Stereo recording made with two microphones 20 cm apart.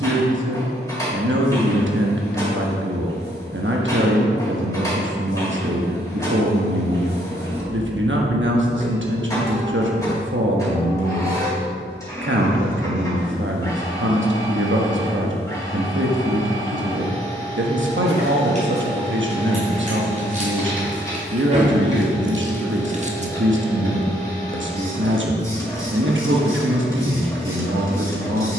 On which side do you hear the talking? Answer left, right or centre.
right.